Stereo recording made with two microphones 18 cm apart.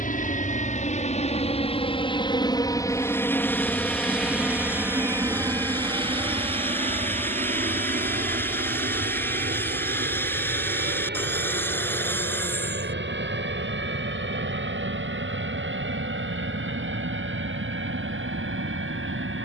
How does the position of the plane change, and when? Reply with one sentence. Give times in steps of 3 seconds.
You can hear the plane on the left from 0 s, in the centre from 3 s and on the right from 6 s.